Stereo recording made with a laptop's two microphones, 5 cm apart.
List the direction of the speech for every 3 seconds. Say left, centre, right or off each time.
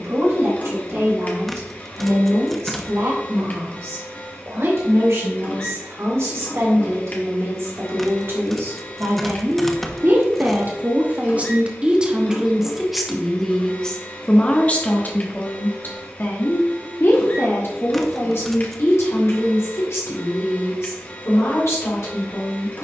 right, right, right, right, centre, left, left, left.